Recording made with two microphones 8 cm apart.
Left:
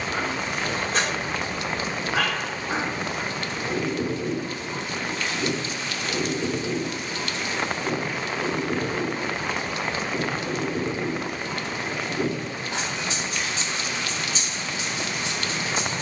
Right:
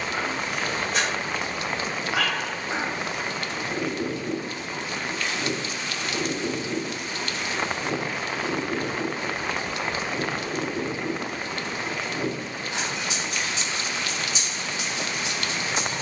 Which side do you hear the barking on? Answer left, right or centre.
left.